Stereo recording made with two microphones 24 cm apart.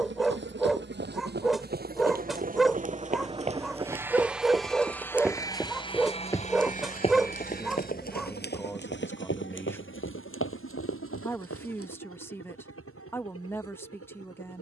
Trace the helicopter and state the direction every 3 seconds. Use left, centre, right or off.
right, centre, left, left, left.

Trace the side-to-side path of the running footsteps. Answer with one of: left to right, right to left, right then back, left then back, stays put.
right to left.